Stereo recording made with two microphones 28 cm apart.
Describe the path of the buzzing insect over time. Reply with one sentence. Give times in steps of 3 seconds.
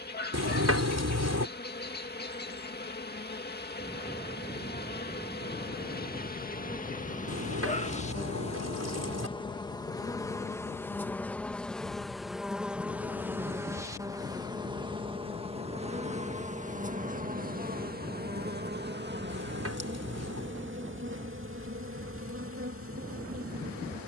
You can hear the buzzing insect on the left from 0 s, in the centre from 9 s and on the right from 15 s.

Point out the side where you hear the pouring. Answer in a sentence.
In this clip you hear the pouring on the right.